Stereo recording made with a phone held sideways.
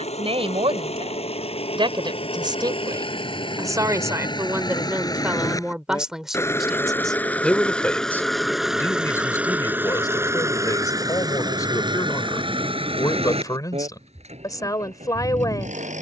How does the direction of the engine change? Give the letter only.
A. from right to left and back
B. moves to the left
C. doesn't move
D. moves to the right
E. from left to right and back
D.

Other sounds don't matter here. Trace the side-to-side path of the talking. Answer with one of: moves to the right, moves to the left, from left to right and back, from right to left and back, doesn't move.
moves to the left.